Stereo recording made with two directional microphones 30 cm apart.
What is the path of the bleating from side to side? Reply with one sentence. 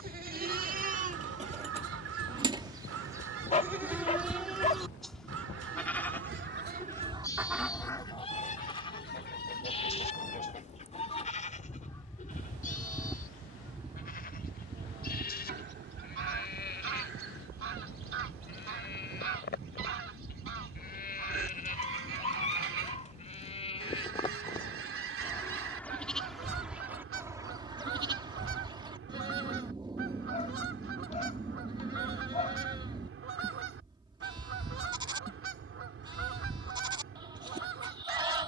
In this clip you hear the bleating go left and come back.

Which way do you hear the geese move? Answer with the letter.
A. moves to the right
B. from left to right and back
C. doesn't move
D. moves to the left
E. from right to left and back
E.